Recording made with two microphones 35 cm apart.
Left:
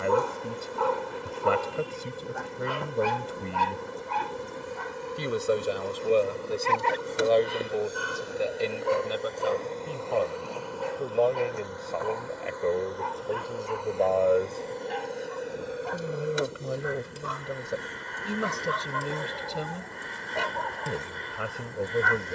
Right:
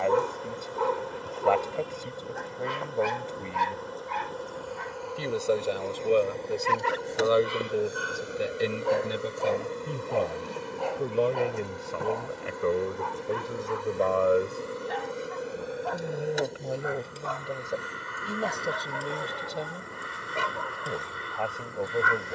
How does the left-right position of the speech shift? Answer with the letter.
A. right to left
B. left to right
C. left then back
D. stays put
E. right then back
E.